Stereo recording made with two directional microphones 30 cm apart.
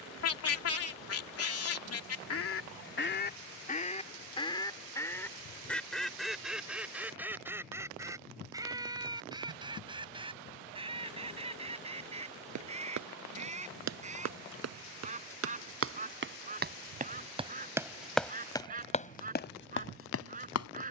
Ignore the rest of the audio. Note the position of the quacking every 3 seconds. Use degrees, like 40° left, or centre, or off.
50° left, 20° left, 10° right, 20° right, 20° right, 20° right, 20° right.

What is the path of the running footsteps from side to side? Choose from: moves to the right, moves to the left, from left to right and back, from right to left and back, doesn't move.
moves to the left.